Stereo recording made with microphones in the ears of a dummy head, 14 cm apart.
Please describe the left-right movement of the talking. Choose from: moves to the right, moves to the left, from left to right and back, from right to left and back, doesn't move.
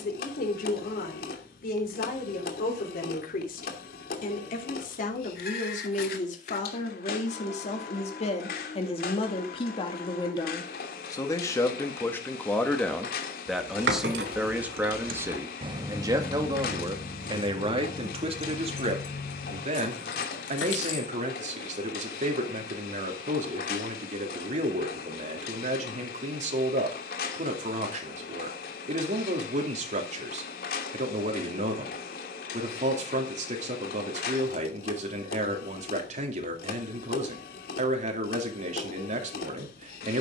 moves to the right.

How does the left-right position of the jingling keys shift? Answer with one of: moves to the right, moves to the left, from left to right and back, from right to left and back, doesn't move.
moves to the left.